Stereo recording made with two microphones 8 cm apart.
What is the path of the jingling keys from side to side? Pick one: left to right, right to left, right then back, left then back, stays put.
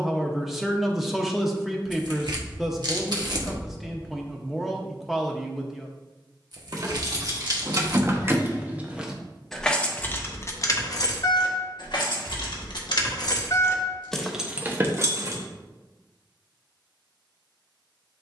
left then back.